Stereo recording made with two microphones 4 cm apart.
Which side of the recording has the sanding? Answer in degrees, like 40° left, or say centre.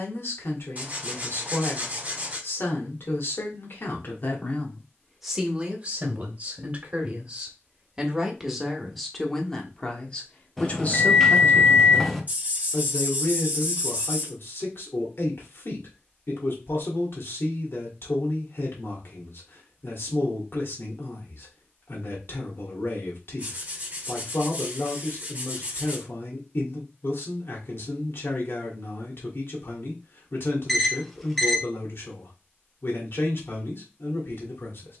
30° right.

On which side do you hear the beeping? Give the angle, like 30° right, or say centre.
centre.